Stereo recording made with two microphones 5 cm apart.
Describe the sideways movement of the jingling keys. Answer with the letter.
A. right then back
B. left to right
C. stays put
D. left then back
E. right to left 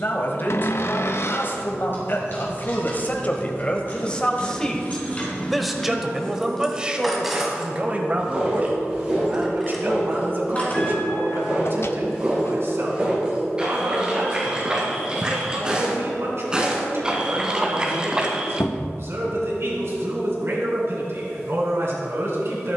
A.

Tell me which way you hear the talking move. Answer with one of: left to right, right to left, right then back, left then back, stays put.
left to right.